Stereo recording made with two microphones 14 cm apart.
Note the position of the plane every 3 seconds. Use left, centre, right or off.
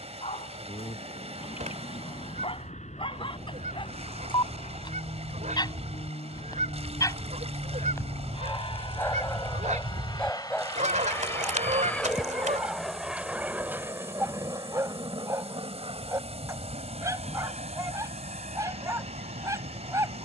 left, left, left, left, centre, right, right.